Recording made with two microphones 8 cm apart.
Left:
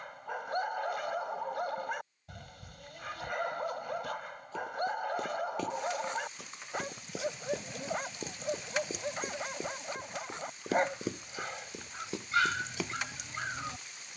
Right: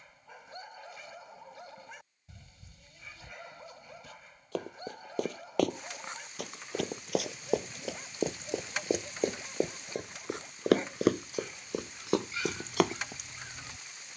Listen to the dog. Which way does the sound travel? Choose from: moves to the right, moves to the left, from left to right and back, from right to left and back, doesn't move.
doesn't move.